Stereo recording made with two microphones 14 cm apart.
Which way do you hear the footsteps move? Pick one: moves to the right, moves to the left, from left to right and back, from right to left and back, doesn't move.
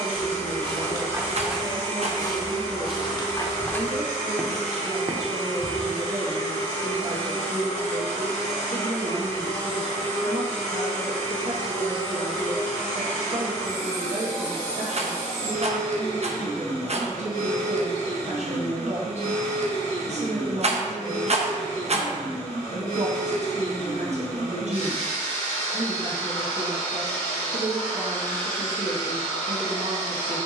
from right to left and back.